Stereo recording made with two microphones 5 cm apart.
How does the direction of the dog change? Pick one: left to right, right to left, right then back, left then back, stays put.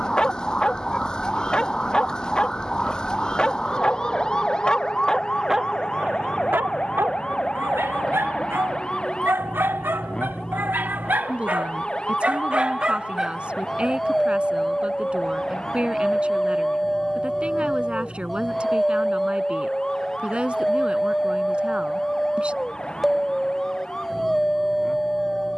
right then back.